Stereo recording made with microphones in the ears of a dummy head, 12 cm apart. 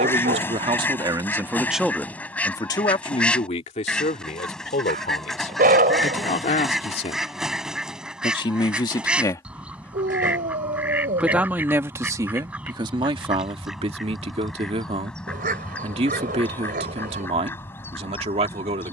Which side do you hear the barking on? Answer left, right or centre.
right.